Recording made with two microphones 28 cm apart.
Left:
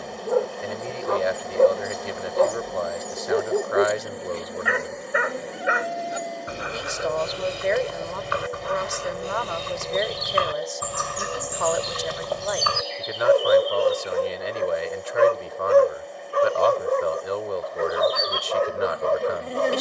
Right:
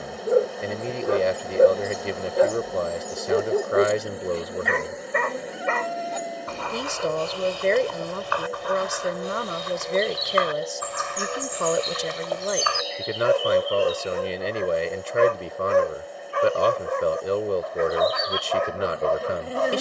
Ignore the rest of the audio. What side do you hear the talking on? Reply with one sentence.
In this clip you hear the talking on the right.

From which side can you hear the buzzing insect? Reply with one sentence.
In this clip you hear the buzzing insect in the centre.